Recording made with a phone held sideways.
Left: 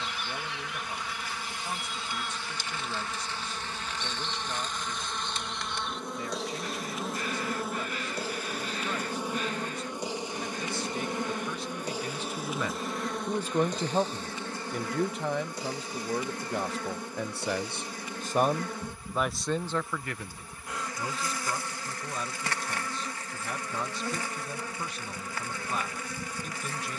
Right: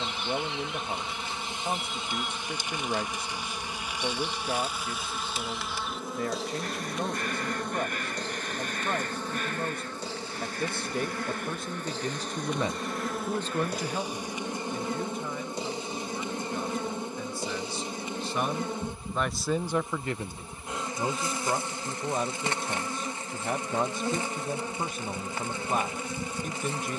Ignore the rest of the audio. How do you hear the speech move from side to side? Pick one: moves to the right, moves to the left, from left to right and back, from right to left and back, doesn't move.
from right to left and back.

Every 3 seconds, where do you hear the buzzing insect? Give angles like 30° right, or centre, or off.
20° right, 10° right, centre, 20° left, 10° right, 20° right, 20° right, 20° right, 20° right.